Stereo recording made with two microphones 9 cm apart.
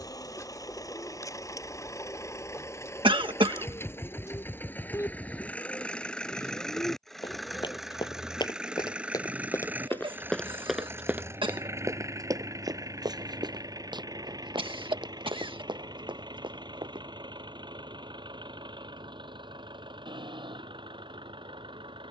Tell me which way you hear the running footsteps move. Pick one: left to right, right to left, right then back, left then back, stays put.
left to right.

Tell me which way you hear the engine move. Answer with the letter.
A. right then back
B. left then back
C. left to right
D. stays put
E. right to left
C.